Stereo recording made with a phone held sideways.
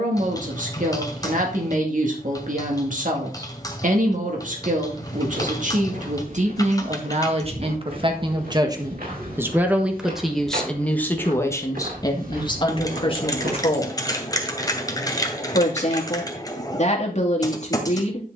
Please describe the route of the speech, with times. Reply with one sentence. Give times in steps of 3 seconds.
In this clip you hear the speech on the right from 0 s, in the centre from 9 s and on the left from 12 s.